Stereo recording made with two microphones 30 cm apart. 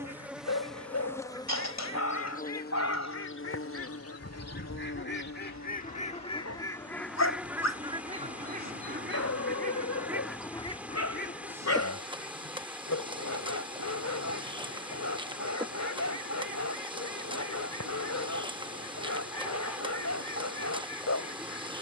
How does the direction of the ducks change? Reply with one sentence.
You can hear the ducks move from left to right and back again.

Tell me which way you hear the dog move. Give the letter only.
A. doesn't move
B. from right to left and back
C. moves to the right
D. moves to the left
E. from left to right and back
A.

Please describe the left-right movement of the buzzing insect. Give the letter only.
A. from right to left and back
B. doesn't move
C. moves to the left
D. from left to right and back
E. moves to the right
A.